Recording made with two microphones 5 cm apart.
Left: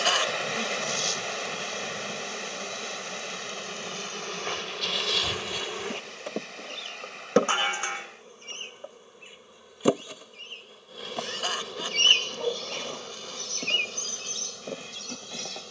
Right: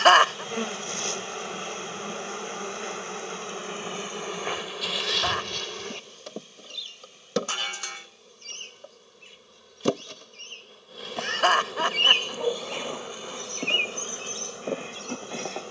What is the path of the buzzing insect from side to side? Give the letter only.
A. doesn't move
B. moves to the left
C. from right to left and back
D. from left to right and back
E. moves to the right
C.